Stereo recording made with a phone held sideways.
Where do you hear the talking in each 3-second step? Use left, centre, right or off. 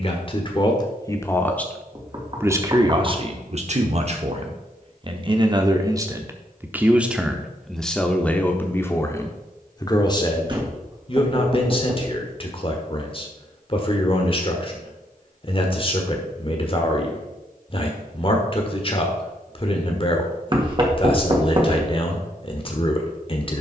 centre, right, centre, left, left, left, left, left.